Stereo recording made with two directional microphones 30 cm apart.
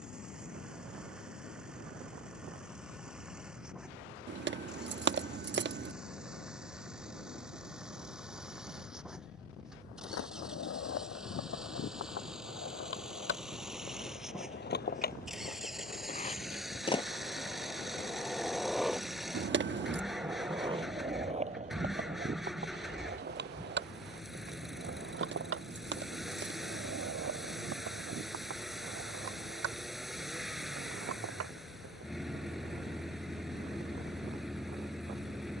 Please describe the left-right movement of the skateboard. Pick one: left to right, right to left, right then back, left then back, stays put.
left to right.